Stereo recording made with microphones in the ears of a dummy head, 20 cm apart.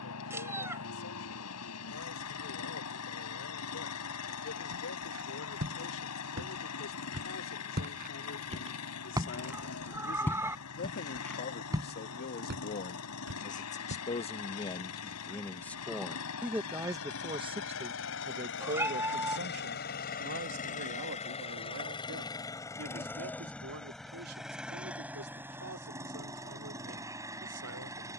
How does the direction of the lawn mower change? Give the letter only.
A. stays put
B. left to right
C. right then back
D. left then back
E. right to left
B.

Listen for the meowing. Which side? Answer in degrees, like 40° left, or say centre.
10° right.